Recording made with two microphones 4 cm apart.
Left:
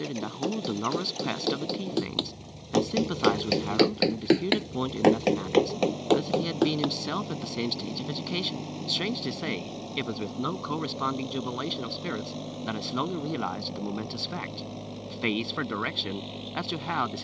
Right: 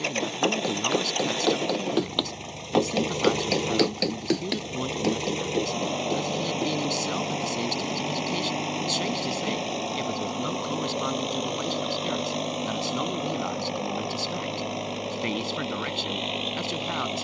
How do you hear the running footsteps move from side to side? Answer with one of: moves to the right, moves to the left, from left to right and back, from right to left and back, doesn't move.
moves to the left.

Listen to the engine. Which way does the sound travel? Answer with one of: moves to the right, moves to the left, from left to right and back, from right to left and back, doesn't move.
doesn't move.